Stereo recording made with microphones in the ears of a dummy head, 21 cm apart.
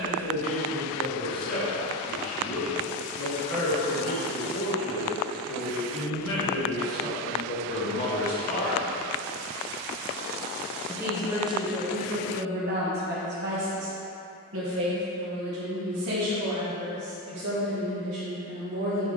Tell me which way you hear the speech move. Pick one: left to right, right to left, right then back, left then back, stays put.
left to right.